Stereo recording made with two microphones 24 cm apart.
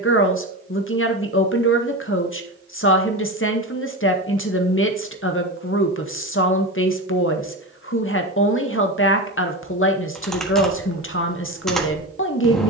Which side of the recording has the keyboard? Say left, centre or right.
centre.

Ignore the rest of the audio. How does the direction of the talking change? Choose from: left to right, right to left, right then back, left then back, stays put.
stays put.